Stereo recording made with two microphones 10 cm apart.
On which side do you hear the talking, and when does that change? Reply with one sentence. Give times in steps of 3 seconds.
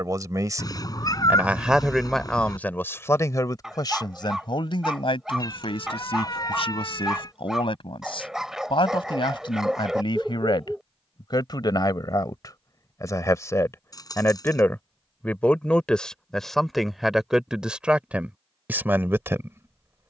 You can hear the talking in the centre from 0 s, on the left from 3 s, in the centre from 15 s and on the right from 18 s.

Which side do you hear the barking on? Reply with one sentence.
You can hear the barking in the centre.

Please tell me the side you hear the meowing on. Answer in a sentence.
You can hear the meowing on the left.